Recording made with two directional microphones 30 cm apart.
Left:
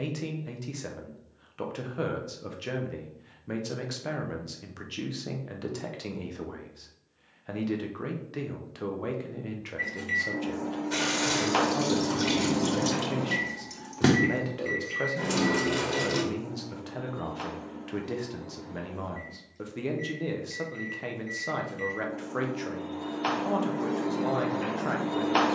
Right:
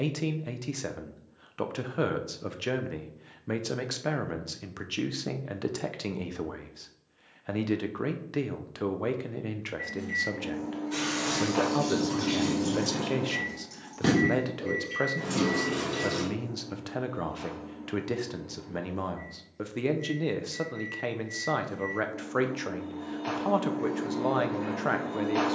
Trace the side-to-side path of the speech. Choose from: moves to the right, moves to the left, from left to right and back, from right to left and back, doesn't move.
doesn't move.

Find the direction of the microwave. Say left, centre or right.
left.